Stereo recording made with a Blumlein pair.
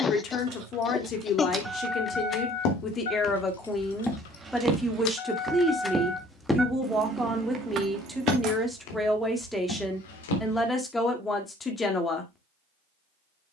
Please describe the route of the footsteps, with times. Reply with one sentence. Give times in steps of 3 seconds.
In this clip you hear the footsteps on the left from 0 s, in the centre from 3 s, on the left from 6 s and not at all from 12 s.